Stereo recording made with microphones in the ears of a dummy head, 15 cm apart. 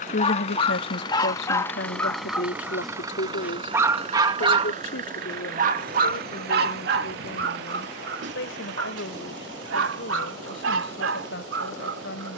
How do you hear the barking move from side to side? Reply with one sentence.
You can hear the barking go from the left side to the right.